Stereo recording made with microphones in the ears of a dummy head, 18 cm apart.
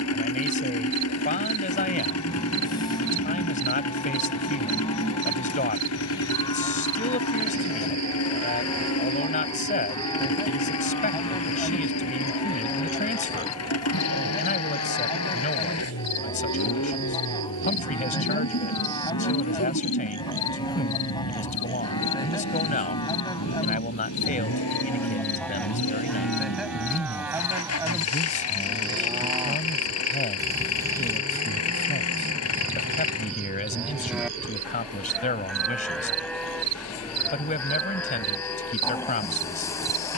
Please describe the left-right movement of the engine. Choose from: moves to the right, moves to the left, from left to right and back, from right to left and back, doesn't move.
doesn't move.